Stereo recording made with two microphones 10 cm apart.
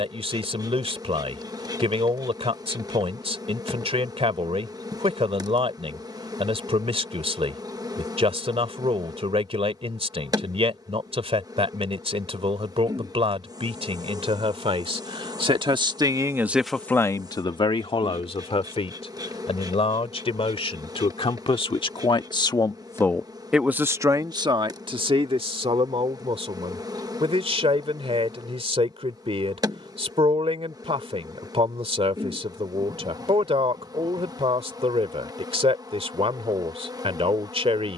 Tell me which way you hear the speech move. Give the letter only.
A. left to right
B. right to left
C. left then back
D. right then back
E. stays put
C.